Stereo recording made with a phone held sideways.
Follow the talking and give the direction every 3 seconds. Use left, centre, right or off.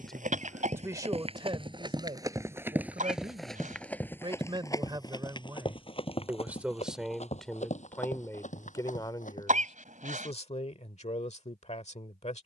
right, right, centre, left.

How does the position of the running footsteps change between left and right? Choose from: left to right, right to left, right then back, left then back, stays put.
right to left.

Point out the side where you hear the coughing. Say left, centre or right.
right.